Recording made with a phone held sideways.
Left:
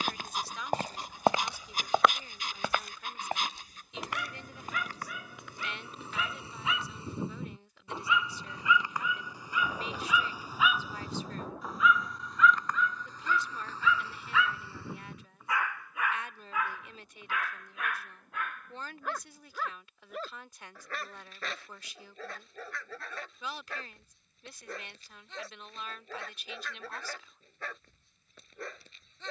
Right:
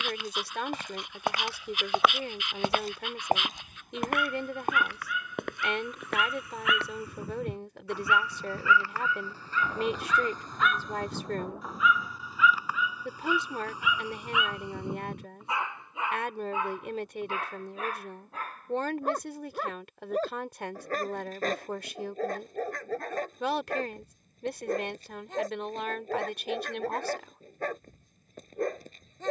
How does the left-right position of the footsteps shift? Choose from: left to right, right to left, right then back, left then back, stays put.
left to right.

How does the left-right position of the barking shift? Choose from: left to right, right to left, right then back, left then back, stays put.
left to right.